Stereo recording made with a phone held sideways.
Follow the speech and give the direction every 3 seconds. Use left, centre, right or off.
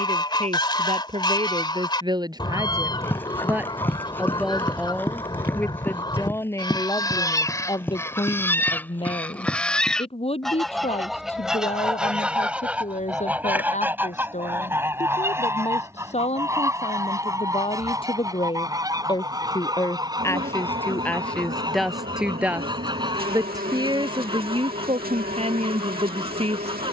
right, centre, left, left, left, left, left, centre, right.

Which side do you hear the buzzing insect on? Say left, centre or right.
right.